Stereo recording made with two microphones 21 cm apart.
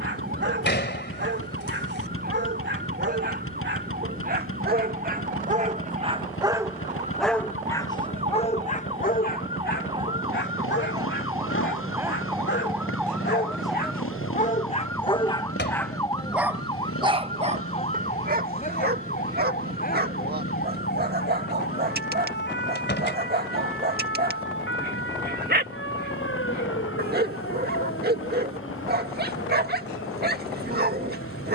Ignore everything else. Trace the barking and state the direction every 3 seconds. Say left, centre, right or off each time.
right, right, centre, left, left, centre, right, right, right, right, right.